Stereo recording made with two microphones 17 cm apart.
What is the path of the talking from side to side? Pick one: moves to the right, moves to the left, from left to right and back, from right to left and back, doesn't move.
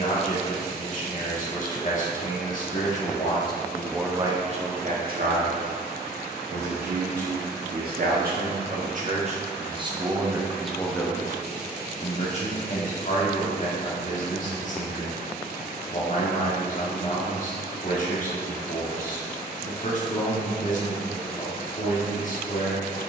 from left to right and back.